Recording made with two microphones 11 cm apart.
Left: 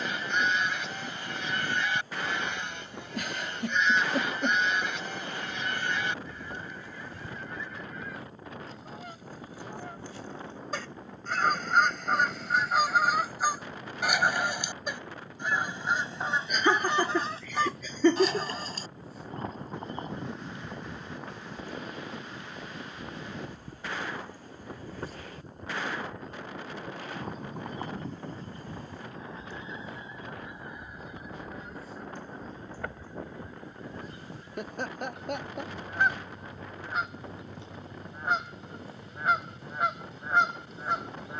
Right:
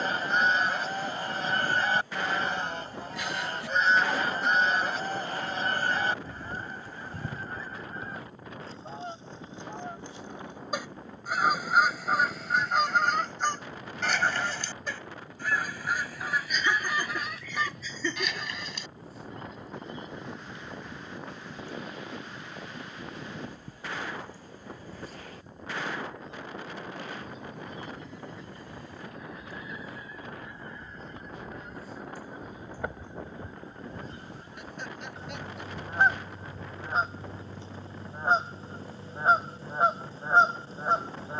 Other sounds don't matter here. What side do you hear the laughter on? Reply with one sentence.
In this clip you hear the laughter on the left.